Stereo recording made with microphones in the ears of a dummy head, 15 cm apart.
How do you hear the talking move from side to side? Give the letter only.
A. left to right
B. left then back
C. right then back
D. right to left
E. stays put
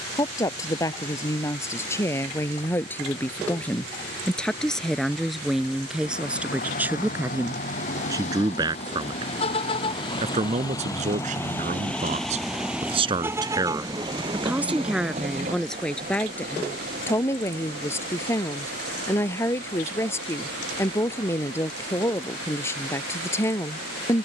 C.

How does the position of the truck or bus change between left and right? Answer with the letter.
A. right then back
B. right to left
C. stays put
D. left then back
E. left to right
E.